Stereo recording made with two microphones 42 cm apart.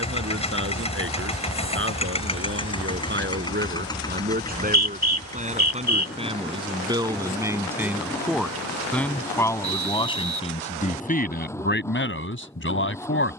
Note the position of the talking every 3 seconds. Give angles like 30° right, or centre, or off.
30° right, 20° right, 10° right, 10° left, 30° left.